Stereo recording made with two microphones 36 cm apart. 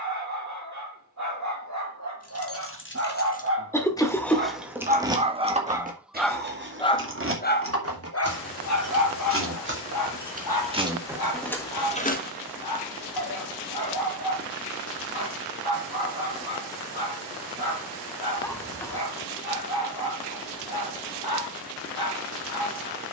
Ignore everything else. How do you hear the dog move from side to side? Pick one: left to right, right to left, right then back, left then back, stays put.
right to left.